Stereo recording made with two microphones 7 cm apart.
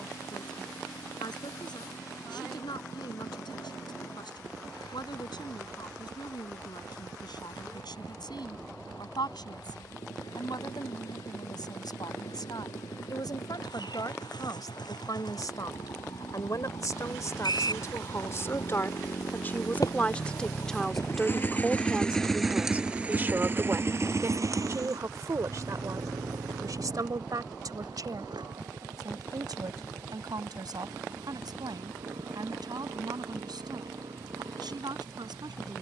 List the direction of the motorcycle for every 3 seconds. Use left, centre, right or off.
left, left, left, left, left, left, left, centre, right, right, right, right.